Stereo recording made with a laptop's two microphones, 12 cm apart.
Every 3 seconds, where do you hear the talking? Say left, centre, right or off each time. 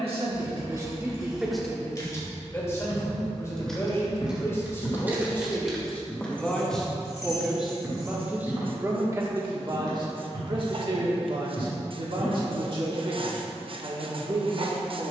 centre, left, centre, right, right.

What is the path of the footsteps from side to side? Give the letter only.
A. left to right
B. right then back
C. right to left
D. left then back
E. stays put
A.